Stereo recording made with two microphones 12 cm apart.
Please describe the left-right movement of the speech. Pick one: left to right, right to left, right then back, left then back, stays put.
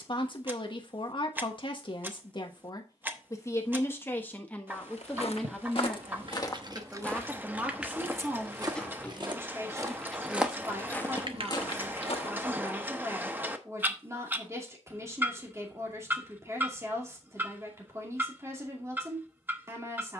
left to right.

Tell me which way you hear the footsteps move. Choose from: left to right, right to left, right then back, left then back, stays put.
right then back.